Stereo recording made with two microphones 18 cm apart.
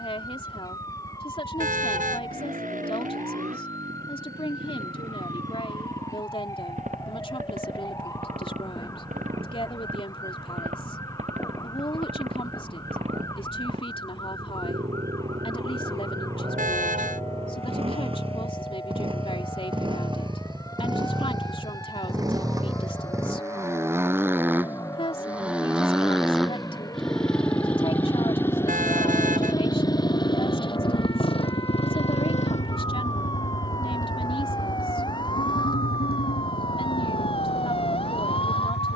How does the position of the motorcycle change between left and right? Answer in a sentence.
In this clip you hear the motorcycle move to the left.